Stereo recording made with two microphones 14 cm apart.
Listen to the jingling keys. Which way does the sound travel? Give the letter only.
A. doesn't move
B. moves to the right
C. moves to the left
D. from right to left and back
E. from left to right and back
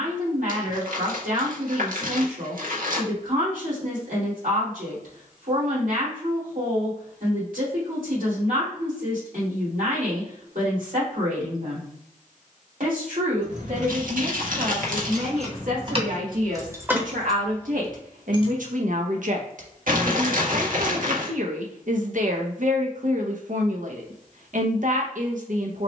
C.